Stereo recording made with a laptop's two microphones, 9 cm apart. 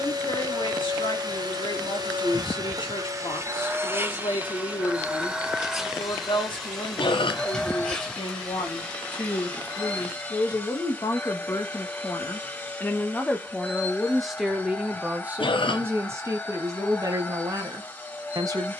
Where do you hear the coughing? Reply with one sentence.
In this clip you hear the coughing on the left.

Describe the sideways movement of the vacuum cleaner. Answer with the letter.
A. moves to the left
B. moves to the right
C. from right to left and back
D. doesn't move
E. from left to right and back
A.